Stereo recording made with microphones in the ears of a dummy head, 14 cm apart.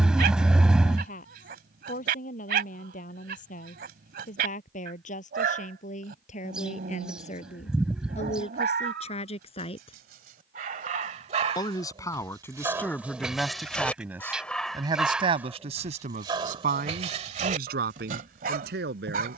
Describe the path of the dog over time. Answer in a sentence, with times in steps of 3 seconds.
In this clip you hear the dog on the right from 0 s, in the centre from 12 s and on the right from 15 s.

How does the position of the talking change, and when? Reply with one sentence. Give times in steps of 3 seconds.
You can hear the talking on the left from 0 s, in the centre from 12 s and on the right from 15 s.